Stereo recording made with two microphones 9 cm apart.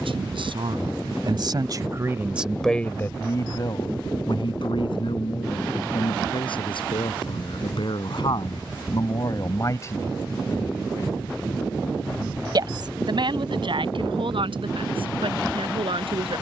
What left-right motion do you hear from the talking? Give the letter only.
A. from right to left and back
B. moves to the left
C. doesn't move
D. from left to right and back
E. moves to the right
A.